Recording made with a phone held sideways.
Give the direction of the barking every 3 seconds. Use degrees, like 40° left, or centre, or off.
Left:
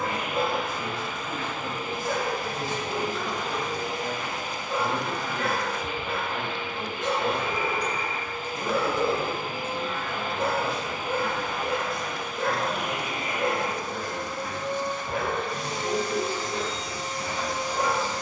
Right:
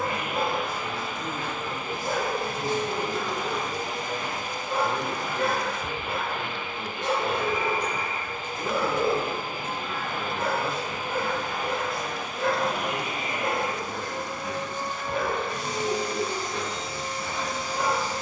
30° right, 30° right, 20° right, 20° left, 50° left, 50° left.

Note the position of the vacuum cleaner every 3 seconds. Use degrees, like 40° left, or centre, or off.
50° right, 50° right, 50° right, 50° right, 30° right, 10° left.